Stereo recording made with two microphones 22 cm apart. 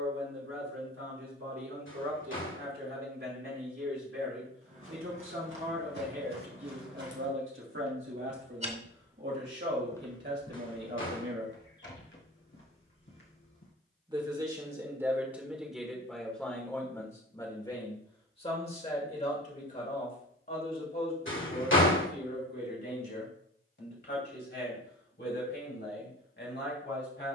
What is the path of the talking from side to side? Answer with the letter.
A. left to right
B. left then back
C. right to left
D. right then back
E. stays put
C.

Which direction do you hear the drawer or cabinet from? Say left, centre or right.
left.